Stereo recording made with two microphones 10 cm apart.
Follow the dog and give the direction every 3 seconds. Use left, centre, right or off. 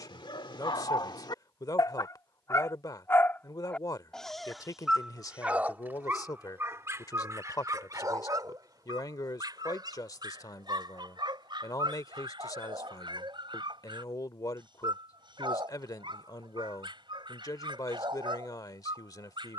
left, centre, right, right, right, right, right.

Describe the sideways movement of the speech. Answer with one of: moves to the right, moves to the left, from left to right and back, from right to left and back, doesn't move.
doesn't move.